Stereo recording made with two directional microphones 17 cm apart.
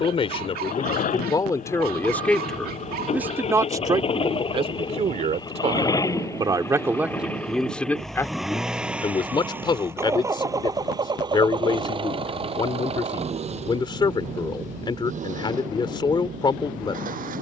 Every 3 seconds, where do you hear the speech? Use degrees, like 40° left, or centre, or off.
20° left, 30° right, centre, 30° left, 30° left, 30° left.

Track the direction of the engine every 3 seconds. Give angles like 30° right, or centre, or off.
50° left, 30° left, 10° left, 20° right, 40° right, 50° right.